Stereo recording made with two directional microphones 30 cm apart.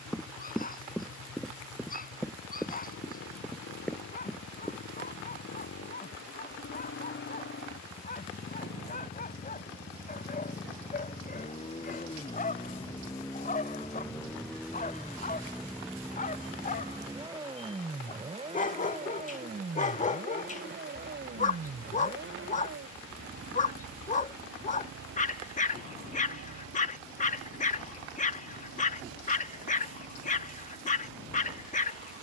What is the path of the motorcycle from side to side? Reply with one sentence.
In this clip you hear the motorcycle move from left to right.